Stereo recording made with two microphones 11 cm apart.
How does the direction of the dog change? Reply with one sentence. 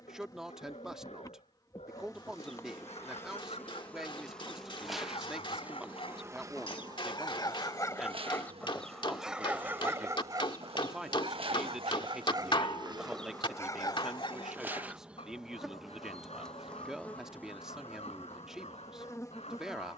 You can hear the dog move from left to right and back again.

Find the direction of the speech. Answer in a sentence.
In this clip you hear the speech in the centre.